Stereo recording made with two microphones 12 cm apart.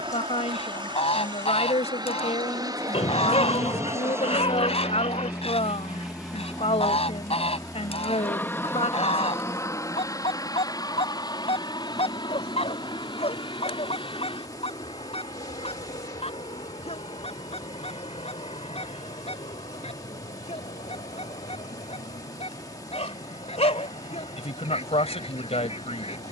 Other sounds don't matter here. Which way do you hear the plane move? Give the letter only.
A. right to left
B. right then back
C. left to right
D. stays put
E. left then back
A.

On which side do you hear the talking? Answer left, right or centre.
left.